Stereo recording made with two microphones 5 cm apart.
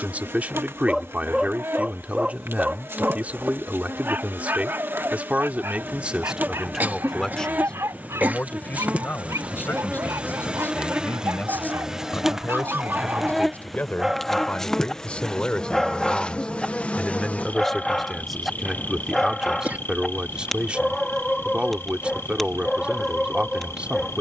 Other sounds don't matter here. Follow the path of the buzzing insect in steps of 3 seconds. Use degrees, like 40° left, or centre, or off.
50° right, 40° right, 30° right, 20° right, centre, 20° left, 40° left, 60° left.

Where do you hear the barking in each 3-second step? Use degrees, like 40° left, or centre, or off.
20° right, 40° right, 60° right, 70° right, 30° right, centre, centre, centre.